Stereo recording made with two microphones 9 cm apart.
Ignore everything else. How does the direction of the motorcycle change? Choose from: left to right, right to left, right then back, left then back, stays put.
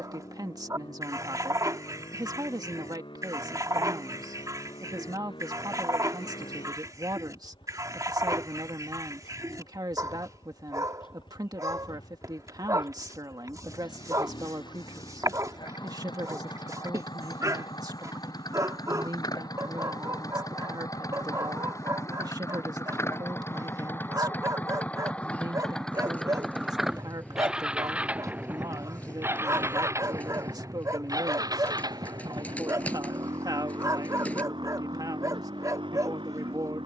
left to right.